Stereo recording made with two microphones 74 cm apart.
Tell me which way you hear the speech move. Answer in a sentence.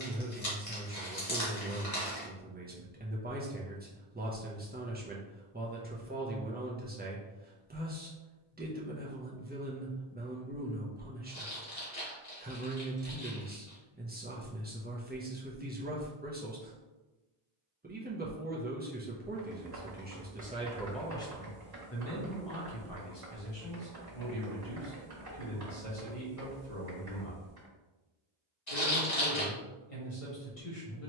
In this clip you hear the speech travel towards the left.